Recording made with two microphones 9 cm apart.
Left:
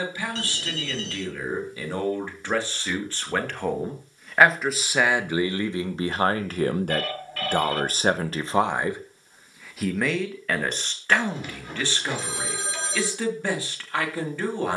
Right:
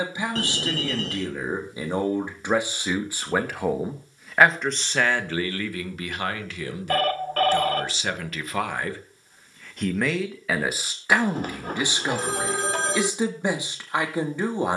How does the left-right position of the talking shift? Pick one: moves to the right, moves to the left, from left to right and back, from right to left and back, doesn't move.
from right to left and back.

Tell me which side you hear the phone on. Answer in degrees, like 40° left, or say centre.
50° right.